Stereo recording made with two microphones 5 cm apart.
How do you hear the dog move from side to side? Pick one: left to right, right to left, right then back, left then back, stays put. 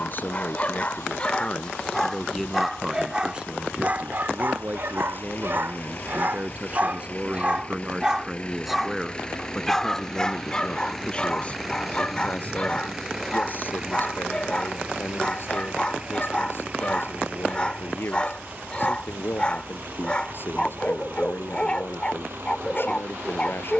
right then back.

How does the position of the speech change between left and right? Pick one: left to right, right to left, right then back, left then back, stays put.
right then back.